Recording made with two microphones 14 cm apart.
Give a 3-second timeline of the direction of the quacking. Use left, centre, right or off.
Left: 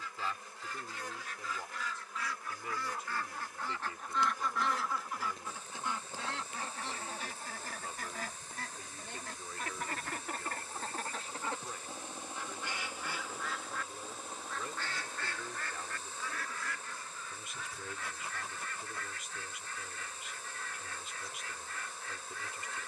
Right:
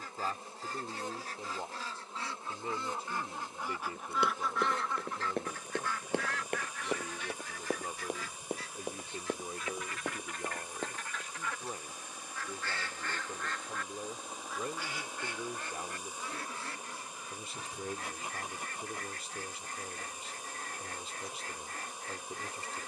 right, centre, left, left, centre, right, right, right.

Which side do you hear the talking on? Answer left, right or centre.
right.